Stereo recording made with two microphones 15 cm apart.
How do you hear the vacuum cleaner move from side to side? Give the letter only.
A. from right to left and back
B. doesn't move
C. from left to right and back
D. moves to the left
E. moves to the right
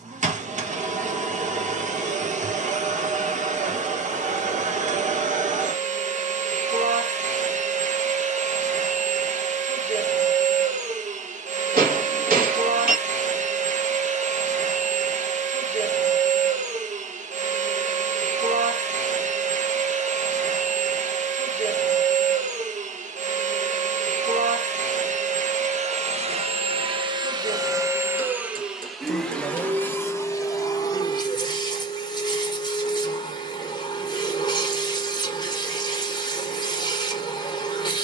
D.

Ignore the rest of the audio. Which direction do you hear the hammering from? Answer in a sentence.
You can hear the hammering on the right.